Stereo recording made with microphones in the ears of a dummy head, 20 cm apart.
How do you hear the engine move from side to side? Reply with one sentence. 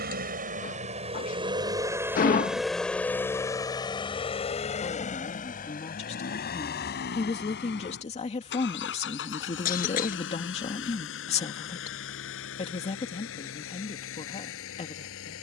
In this clip you hear the engine travel towards the left.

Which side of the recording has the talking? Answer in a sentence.
You can hear the talking on the left.